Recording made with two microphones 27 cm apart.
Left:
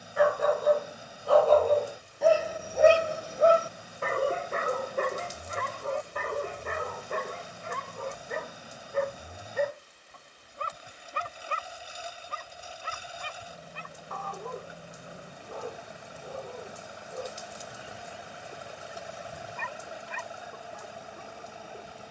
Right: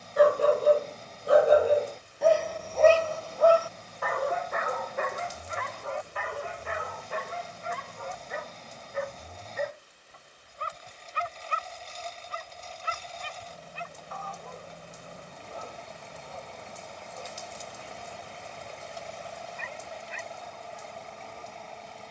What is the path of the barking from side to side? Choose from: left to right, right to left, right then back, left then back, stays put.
right to left.